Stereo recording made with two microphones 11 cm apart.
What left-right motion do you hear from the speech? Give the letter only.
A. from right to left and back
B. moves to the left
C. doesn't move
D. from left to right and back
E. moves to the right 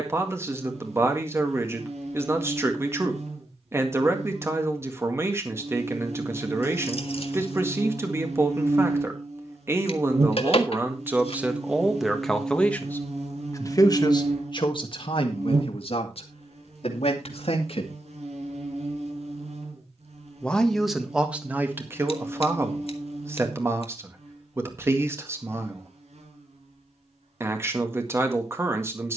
A.